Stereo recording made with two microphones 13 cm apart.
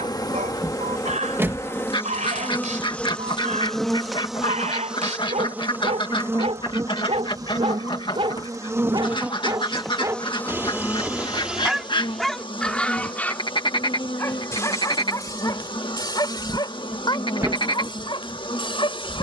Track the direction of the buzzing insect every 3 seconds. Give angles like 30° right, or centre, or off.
20° left, centre, 20° right, 10° left, 40° left, 40° left, 40° left.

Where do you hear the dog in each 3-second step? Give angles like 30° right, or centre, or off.
70° right, 70° right, 50° right, 20° right, 10° left, 30° left, 40° left.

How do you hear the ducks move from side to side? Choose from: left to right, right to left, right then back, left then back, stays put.
stays put.